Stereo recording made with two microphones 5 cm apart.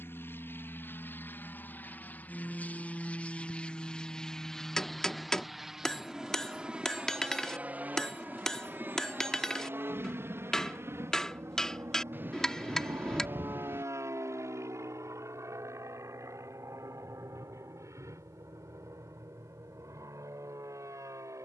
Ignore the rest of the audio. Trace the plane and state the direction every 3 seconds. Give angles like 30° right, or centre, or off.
40° left, 10° left, 30° right, 50° right, 60° right, 70° right, 70° right.